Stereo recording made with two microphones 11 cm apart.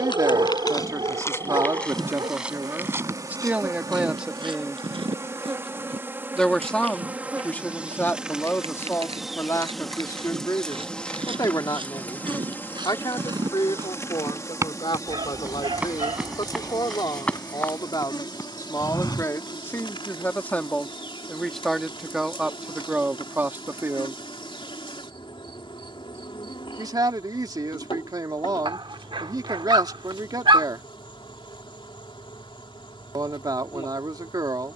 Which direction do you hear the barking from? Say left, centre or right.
right.